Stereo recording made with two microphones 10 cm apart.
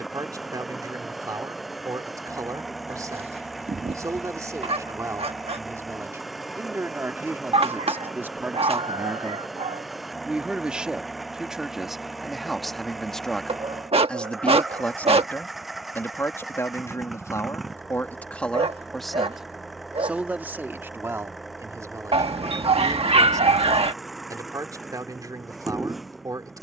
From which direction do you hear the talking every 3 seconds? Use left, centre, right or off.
right, right, right, centre, centre, left, centre, right, right.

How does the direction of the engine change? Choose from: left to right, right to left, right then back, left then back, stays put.
stays put.